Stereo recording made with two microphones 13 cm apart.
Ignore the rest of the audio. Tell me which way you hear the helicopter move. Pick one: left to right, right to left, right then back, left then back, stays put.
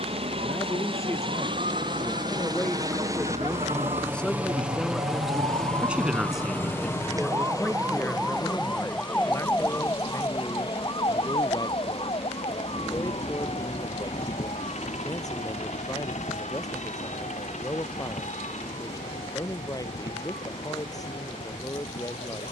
right to left.